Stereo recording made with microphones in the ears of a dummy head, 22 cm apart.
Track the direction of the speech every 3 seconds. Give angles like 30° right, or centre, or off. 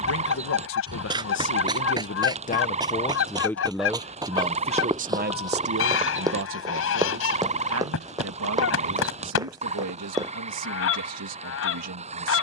40° left, 20° right, 60° right, 70° right.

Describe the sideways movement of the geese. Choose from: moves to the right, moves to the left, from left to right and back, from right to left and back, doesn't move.
doesn't move.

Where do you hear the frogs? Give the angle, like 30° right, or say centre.
30° right.